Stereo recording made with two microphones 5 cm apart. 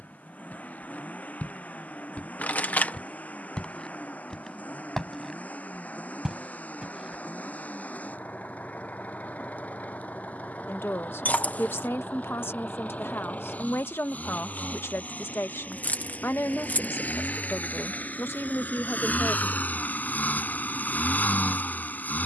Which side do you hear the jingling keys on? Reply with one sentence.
In this clip you hear the jingling keys on the left.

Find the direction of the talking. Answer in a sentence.
You can hear the talking on the left.